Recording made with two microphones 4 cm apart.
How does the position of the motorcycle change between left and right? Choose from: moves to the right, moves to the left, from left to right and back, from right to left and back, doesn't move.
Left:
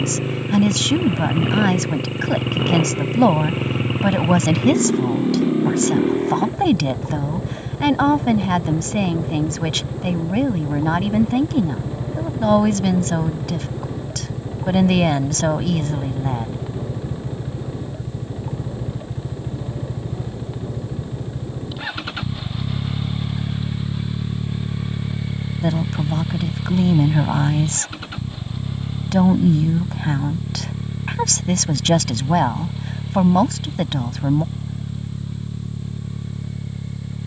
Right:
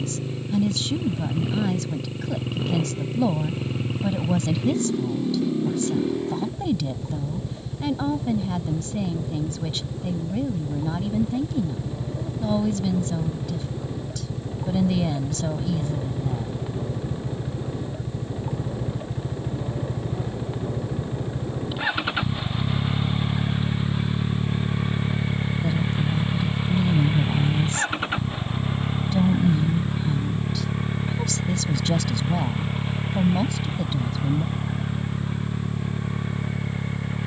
moves to the right.